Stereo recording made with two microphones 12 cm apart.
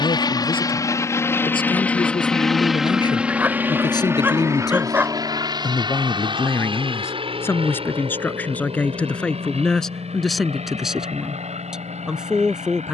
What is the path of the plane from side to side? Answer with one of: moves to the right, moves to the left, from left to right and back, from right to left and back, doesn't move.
moves to the right.